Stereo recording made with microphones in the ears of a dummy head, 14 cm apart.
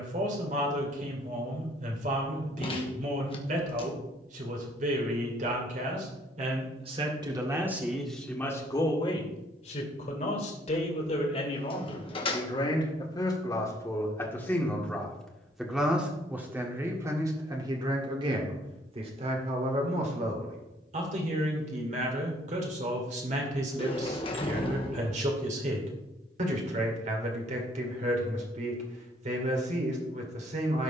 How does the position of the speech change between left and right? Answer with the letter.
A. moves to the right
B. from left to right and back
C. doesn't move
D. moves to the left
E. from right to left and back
E.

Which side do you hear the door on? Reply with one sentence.
You can hear the door on the left.